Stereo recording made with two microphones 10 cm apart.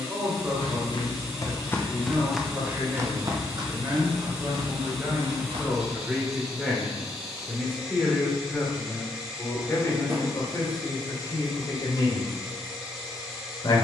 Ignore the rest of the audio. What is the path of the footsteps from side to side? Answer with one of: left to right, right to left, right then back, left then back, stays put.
left to right.